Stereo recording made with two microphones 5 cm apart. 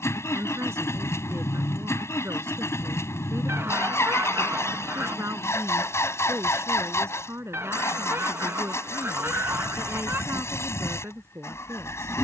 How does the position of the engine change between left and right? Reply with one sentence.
In this clip you hear the engine stay in one place.